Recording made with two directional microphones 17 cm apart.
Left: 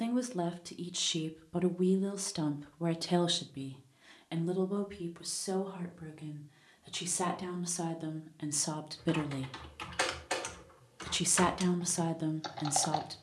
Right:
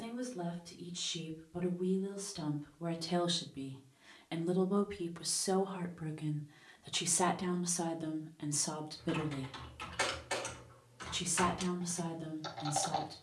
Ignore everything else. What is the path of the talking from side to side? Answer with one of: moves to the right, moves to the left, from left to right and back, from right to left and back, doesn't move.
from left to right and back.